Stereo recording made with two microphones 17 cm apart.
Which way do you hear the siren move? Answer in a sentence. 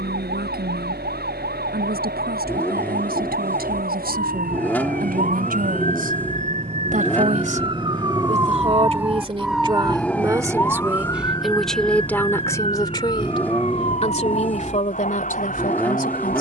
You can hear the siren move from right to left.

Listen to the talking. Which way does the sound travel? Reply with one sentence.
You can hear the talking travel towards the left.